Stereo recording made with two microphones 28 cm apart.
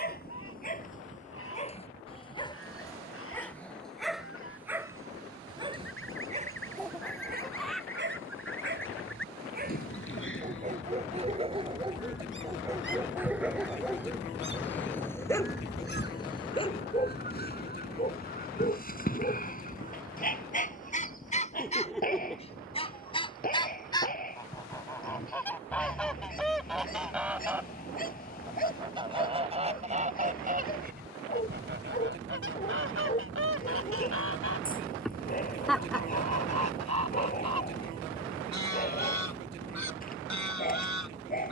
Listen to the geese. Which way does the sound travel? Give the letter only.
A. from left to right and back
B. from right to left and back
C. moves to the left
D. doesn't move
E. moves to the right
E.